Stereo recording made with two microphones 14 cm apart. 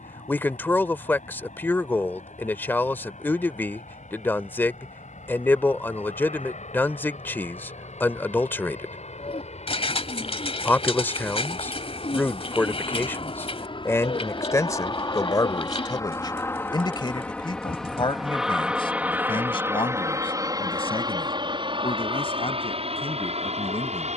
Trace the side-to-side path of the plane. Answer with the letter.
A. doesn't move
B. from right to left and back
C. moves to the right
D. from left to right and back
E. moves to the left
C.